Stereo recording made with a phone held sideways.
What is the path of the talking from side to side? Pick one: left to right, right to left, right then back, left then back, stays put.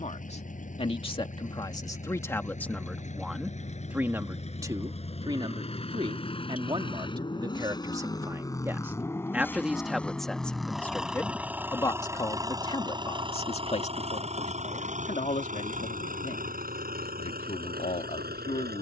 right then back.